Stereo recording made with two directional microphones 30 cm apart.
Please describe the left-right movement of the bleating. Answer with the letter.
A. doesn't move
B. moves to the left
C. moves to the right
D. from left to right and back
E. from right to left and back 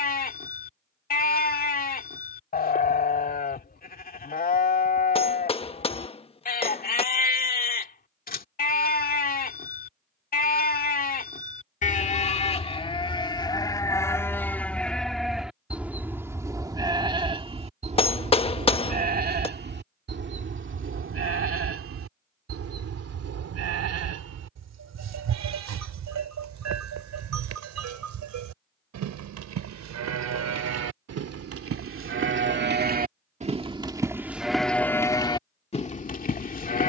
D.